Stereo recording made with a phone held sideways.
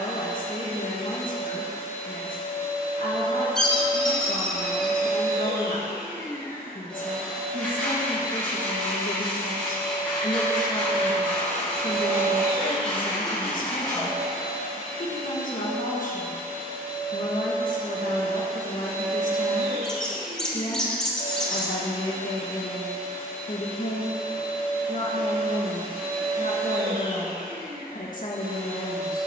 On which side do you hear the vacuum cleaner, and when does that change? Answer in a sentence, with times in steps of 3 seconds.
You can hear the vacuum cleaner on the left from 0 s, in the centre from 6 s and on the right from 9 s.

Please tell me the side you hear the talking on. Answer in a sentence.
You can hear the talking on the left.